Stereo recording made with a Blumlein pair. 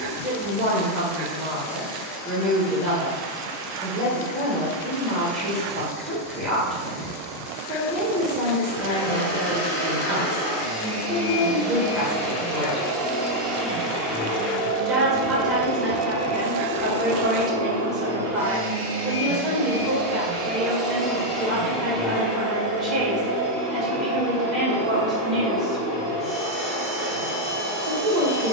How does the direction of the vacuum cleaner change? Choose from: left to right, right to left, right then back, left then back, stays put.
right then back.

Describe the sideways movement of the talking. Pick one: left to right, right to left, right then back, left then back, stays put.
stays put.